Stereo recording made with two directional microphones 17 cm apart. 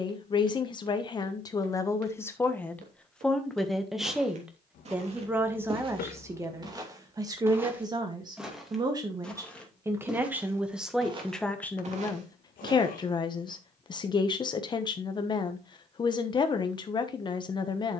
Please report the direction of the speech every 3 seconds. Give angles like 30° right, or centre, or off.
20° left, 10° right, 20° right, 10° right, 30° left, 30° left.